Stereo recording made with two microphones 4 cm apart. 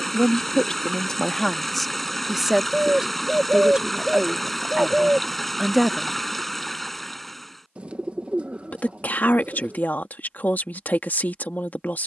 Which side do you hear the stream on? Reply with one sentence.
You can hear the stream in the centre.